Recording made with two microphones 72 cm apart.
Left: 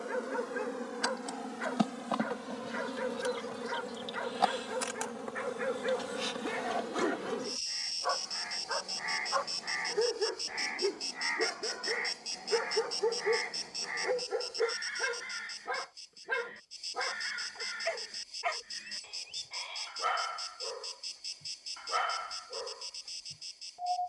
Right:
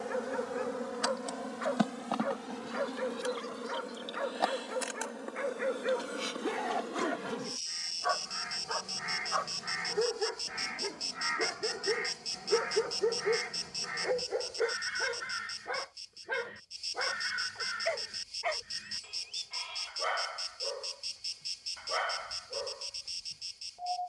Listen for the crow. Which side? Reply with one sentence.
You can hear the crow on the right.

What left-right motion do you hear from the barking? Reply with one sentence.
In this clip you hear the barking go right and come back.